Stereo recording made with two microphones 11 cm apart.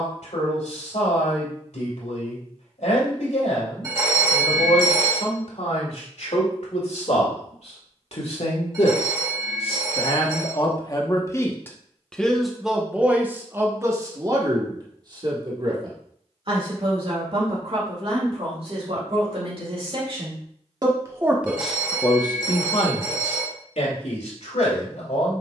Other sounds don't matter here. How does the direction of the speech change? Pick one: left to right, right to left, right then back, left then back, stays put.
right then back.